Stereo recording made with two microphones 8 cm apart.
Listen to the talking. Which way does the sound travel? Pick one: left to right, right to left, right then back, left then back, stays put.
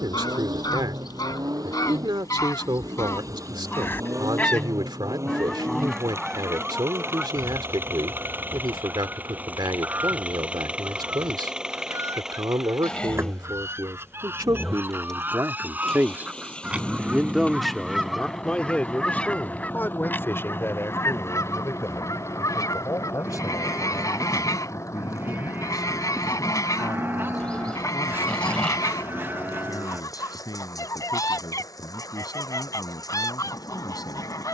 right to left.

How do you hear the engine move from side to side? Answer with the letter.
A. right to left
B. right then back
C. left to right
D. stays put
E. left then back
A.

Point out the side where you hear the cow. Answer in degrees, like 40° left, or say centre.
30° right.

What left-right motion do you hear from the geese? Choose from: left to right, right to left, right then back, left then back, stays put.
right then back.